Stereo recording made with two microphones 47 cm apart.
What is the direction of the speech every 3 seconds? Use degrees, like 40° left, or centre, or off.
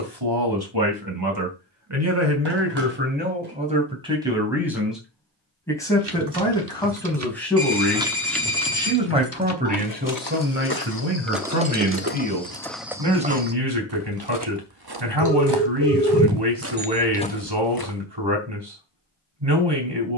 40° right, 10° right, centre, 20° right, 50° right, 50° right, 50° right.